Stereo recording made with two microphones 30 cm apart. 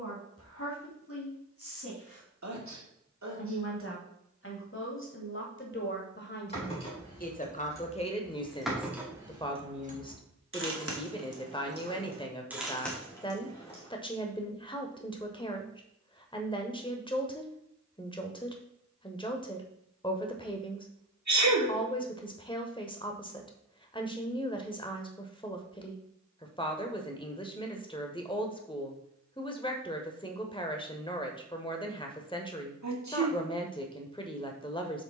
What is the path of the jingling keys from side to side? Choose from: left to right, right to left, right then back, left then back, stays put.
right then back.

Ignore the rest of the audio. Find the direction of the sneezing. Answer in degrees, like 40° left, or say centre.
70° right.